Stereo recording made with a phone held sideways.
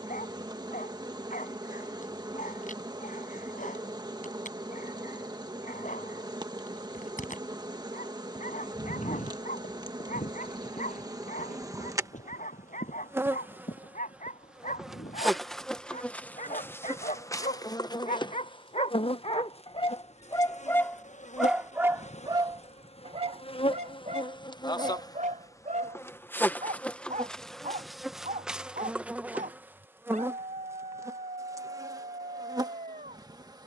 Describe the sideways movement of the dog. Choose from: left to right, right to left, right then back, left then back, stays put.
left to right.